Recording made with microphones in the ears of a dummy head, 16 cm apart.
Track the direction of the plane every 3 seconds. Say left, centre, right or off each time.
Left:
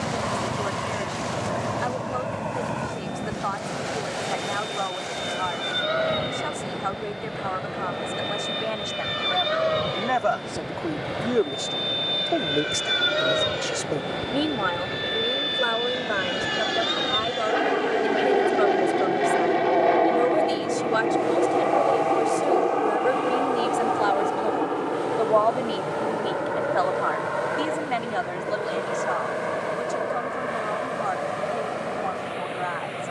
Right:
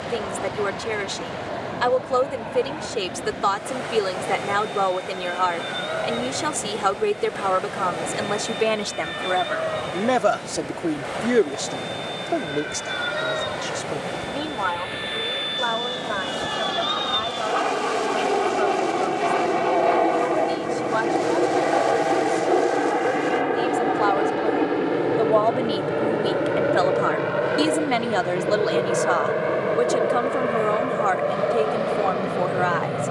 left, left, left, left, left, left, centre, centre, right, right, right.